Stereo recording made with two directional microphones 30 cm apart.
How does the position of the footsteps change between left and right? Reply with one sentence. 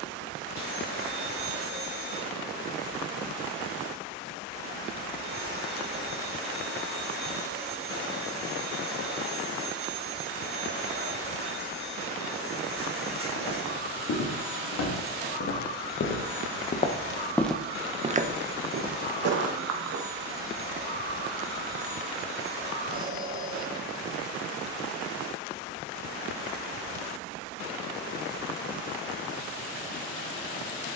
You can hear the footsteps go from the left side to the right.